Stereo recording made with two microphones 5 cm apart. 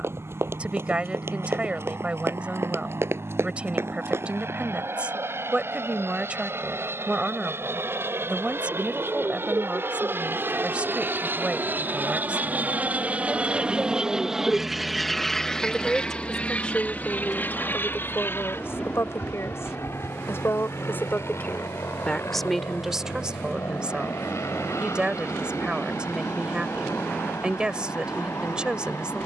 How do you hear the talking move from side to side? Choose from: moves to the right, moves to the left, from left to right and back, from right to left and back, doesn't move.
from right to left and back.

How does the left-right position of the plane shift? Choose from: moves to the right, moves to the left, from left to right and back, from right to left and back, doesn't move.
moves to the left.